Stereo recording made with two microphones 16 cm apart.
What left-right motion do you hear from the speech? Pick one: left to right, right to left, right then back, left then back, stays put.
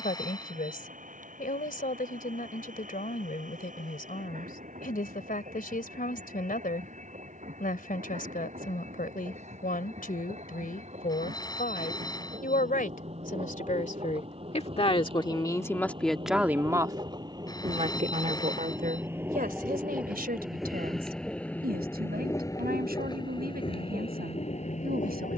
left to right.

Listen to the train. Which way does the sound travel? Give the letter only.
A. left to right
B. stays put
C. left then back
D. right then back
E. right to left
E.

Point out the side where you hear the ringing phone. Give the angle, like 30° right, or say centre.
20° left.